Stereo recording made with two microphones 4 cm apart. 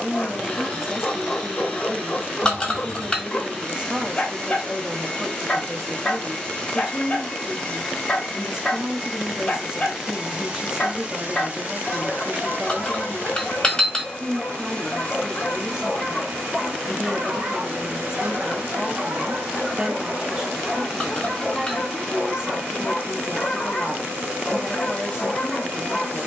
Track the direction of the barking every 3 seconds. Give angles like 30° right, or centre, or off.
20° left, 20° left, 20° left, 20° left, 20° left, centre, 20° right, 10° left, 10° left.